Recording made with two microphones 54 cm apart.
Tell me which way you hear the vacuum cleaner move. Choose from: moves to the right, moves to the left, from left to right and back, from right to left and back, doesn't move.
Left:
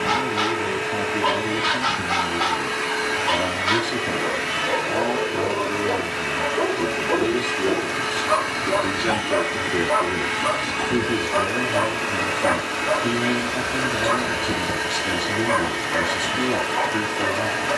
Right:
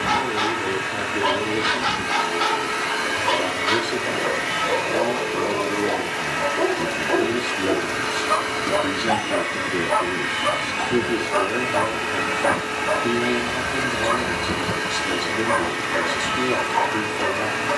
from right to left and back.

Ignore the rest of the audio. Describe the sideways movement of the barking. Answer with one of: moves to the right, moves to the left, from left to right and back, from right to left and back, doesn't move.
moves to the right.